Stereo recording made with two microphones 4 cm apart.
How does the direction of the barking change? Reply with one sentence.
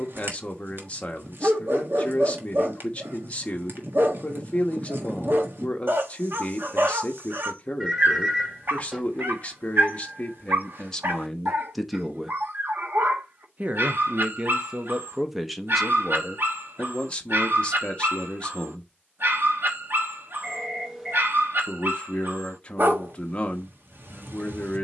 In this clip you hear the barking stay in one place.